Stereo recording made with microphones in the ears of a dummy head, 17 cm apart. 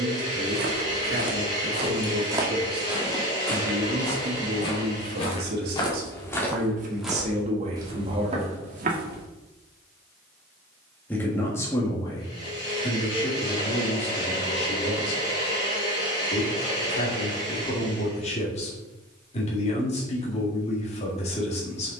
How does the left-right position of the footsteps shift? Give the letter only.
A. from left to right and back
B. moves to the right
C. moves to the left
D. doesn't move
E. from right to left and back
E.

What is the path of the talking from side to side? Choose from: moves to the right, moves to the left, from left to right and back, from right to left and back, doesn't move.
moves to the left.